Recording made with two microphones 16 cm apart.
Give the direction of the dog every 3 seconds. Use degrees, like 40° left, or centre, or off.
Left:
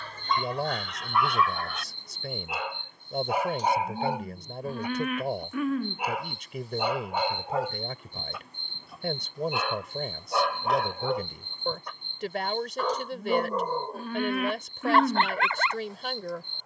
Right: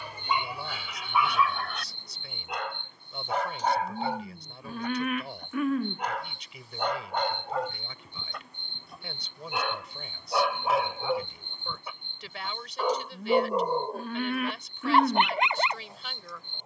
centre, 10° left, 10° left, centre, 10° right, 20° right.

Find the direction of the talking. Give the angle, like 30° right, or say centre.
50° left.